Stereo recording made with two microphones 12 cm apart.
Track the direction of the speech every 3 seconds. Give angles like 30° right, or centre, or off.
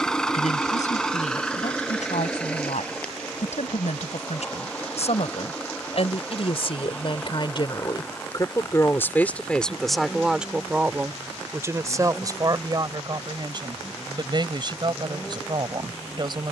80° left, 70° left, 40° left, 10° right, 40° right, 40° right.